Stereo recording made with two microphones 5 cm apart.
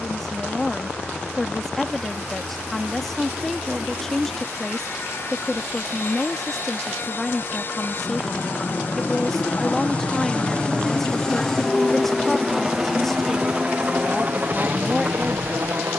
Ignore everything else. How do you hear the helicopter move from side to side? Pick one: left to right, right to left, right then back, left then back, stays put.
left to right.